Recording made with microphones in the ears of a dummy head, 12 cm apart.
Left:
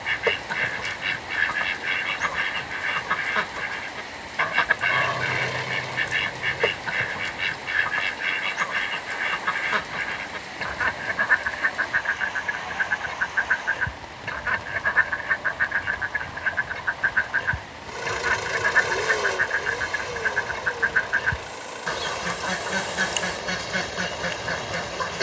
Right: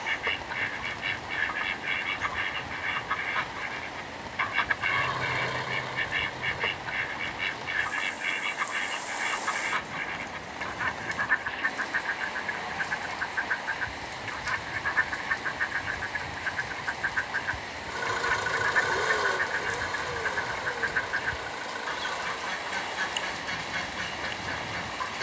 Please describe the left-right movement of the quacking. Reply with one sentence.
You can hear the quacking stay in one place.